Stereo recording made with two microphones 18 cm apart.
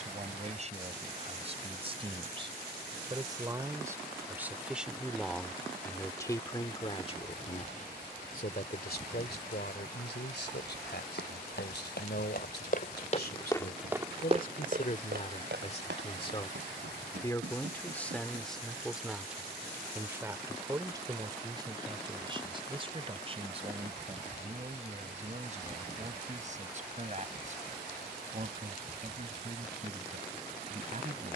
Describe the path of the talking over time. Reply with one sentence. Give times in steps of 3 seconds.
In this clip you hear the talking on the right from 0 s, in the centre from 3 s, on the left from 6 s, in the centre from 18 s and on the right from 21 s.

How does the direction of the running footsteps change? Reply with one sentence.
In this clip you hear the running footsteps move to the right.